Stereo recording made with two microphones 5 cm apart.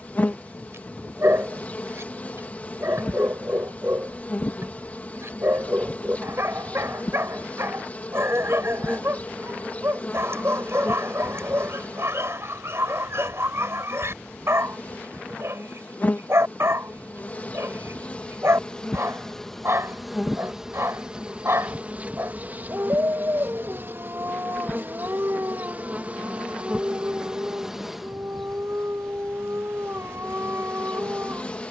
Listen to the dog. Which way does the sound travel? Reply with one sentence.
In this clip you hear the dog stay put.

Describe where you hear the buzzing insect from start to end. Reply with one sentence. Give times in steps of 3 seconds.
In this clip you hear the buzzing insect on the left from 0 s, in the centre from 18 s, on the right from 21 s, in the centre from 27 s and on the left from 30 s.